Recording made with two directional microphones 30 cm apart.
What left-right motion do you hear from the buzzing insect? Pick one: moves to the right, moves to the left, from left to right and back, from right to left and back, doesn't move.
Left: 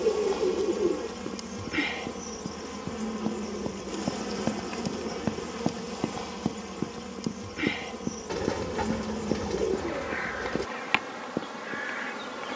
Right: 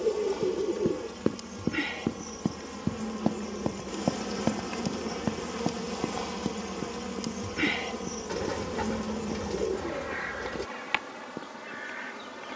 from left to right and back.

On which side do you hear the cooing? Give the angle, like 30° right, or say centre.
20° left.